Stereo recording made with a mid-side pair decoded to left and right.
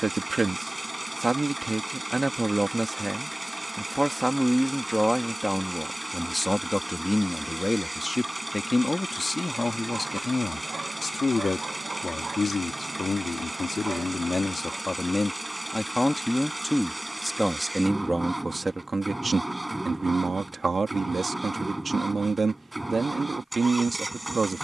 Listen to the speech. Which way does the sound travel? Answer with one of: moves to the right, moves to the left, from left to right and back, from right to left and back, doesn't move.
from right to left and back.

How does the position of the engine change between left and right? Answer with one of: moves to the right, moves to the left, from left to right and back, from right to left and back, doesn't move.
doesn't move.